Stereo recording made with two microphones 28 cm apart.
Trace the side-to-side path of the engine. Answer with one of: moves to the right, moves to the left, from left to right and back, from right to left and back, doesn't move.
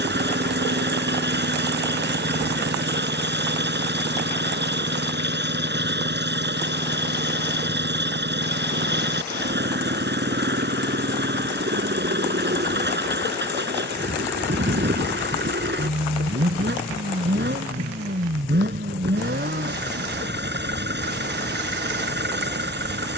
doesn't move.